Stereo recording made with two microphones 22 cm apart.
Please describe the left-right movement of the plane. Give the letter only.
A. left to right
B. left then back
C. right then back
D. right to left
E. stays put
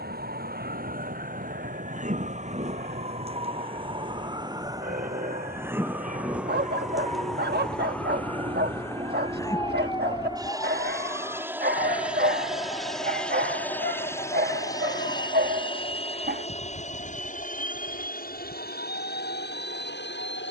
D.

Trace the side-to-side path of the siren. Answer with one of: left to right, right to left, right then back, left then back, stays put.
right to left.